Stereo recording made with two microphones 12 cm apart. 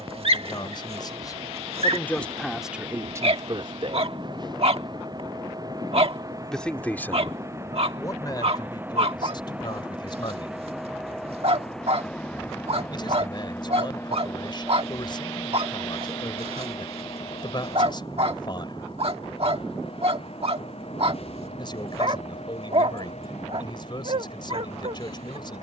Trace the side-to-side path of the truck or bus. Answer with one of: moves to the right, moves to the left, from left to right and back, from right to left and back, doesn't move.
moves to the left.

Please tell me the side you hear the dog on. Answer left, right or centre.
right.